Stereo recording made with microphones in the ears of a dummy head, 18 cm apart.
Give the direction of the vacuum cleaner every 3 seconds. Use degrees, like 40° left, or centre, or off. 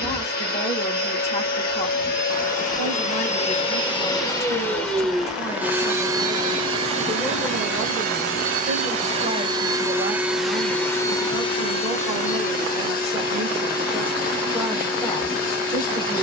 50° left, 10° left, 30° right, centre, 50° left, 50° left.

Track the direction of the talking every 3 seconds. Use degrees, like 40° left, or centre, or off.
30° left, 30° left, 10° right, 30° right, centre, 20° left.